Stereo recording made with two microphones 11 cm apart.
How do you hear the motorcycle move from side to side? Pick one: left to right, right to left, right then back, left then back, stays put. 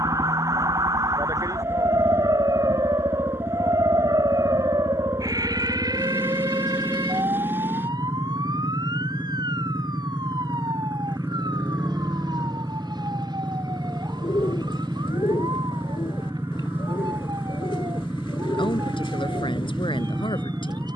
stays put.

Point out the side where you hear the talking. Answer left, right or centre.
left.